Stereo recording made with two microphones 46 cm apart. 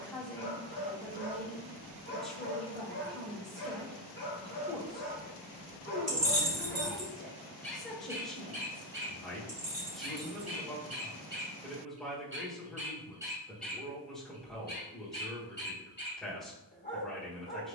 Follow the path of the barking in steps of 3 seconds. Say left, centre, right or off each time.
left, left, centre, right, centre, left.